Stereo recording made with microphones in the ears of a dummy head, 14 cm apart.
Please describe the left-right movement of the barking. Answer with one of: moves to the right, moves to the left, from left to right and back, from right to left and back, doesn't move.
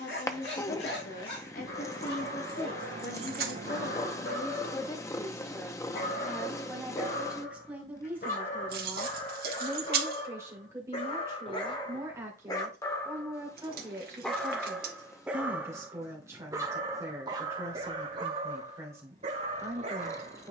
moves to the right.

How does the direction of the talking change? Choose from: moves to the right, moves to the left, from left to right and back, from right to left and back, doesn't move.
moves to the right.